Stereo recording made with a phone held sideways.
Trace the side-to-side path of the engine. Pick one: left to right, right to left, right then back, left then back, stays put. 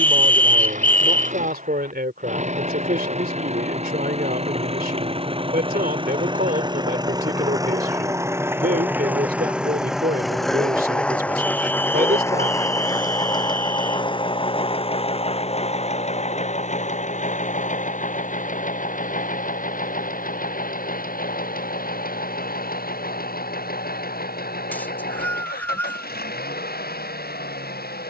right to left.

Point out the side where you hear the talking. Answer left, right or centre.
right.